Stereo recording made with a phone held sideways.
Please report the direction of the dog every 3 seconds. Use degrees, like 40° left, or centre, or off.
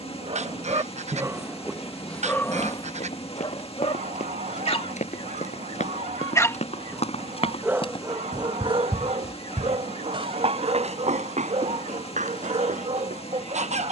10° right, 40° left, 10° right, 50° right, 50° right.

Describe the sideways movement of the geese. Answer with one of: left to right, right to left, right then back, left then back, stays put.
stays put.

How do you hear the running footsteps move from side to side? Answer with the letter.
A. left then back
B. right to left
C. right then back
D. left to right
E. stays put
D.